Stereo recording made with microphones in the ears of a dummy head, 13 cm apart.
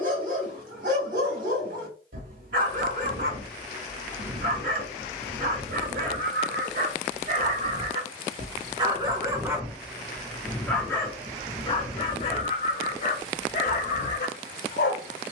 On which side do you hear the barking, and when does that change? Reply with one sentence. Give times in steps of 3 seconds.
You can hear the barking on the right from 0 s, in the centre from 9 s and on the left from 12 s.